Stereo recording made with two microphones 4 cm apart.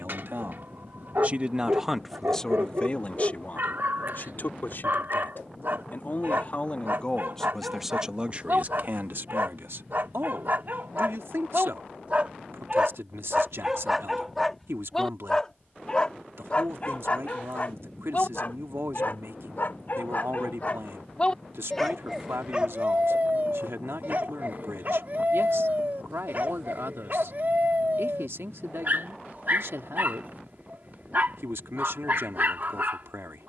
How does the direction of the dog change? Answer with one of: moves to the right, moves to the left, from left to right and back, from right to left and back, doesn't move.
from right to left and back.